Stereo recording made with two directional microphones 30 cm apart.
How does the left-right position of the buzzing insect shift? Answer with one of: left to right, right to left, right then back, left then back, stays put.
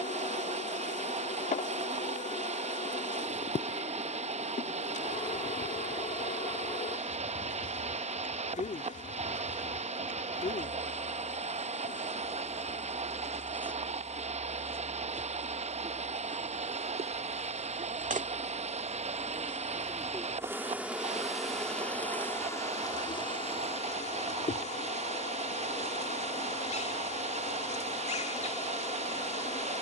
right then back.